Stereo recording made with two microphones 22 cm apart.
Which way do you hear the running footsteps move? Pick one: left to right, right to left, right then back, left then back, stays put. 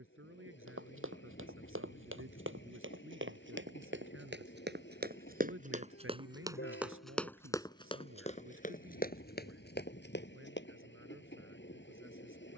right to left.